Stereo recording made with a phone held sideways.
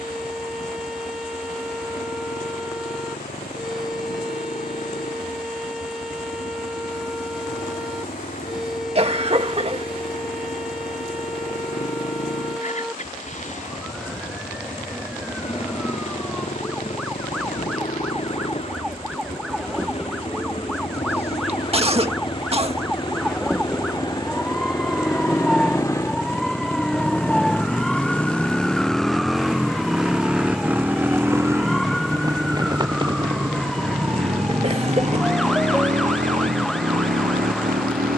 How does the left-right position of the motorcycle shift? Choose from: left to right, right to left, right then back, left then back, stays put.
left to right.